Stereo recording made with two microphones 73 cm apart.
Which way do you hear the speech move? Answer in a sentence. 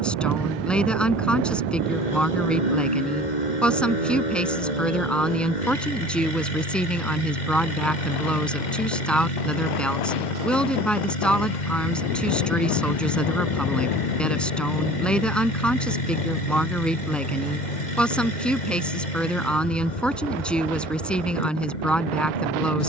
In this clip you hear the speech stay in one place.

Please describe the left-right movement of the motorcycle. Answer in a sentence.
You can hear the motorcycle stay put.